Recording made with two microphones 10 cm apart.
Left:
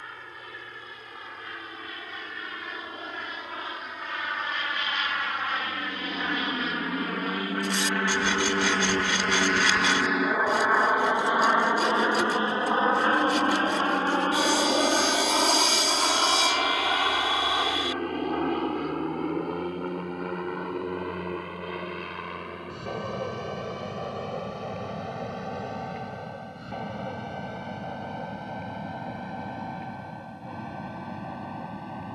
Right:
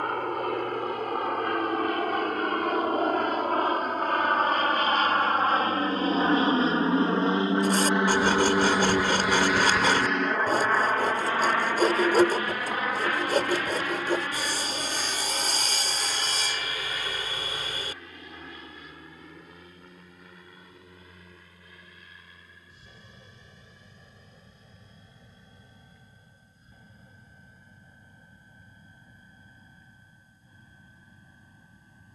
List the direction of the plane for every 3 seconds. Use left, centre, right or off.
right, right, right, centre, left, left, left, left, left, left, left.